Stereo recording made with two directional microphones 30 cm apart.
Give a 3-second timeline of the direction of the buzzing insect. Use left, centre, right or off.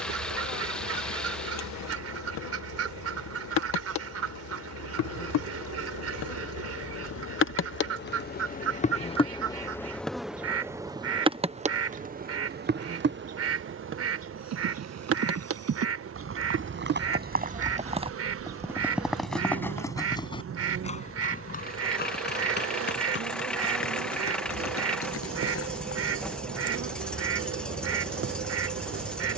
left, left, left, centre, right, right, right, right, right, right.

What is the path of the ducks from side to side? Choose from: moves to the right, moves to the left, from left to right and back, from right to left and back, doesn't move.
doesn't move.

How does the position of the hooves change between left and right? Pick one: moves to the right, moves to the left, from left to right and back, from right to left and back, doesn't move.
moves to the left.